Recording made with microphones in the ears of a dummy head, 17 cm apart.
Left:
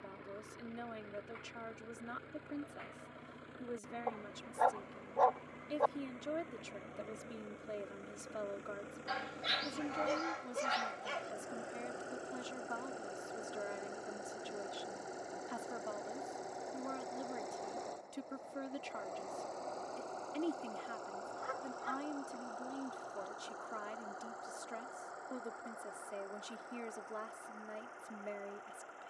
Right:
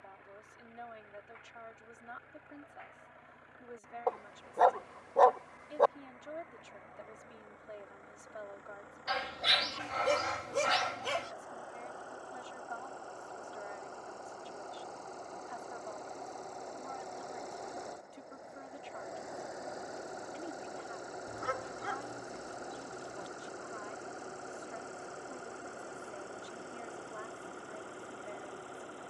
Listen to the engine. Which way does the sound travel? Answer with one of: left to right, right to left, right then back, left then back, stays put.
left to right.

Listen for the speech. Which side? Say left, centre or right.
left.